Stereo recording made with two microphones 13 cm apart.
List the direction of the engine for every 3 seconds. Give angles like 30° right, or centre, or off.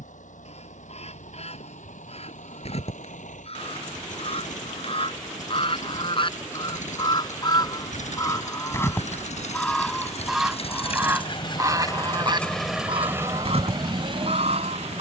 80° left, 80° left, 70° left, 50° left, 20° right.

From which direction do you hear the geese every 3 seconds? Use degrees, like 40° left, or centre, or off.
60° left, 50° left, 30° left, 10° right, 50° right.